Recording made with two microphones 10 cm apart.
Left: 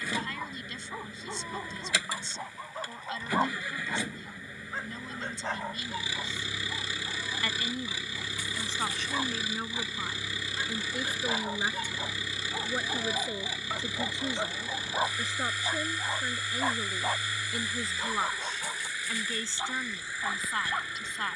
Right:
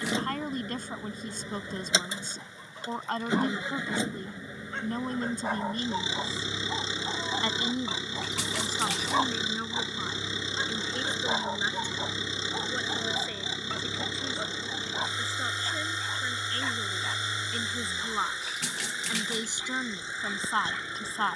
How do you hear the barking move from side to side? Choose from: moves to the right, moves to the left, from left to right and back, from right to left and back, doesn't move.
from left to right and back.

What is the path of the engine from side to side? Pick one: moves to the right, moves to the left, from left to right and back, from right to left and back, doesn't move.
doesn't move.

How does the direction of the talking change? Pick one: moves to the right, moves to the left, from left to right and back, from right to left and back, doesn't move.
from right to left and back.